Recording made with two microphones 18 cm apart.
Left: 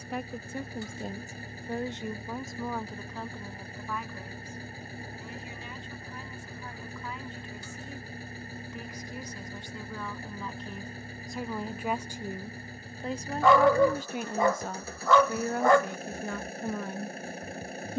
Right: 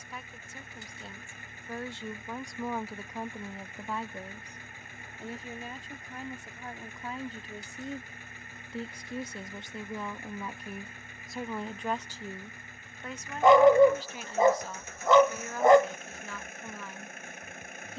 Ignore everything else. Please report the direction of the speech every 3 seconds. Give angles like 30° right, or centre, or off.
30° left, 30° right, 40° right, 10° right, 40° left, 50° left.